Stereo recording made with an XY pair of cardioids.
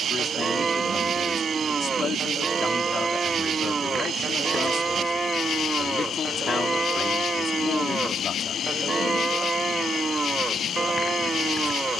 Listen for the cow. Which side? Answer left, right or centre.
right.